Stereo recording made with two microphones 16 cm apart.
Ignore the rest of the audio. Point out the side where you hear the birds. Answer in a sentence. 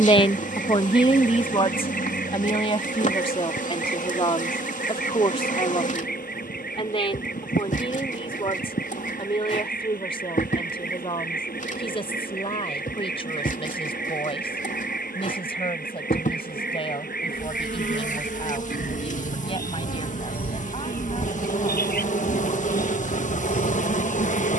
In this clip you hear the birds on the left.